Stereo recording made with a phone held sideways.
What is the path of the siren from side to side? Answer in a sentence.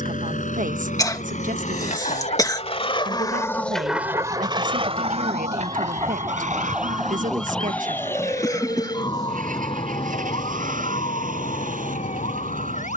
You can hear the siren go from the right side to the left.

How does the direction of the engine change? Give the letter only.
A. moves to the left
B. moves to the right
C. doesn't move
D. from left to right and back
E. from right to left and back
B.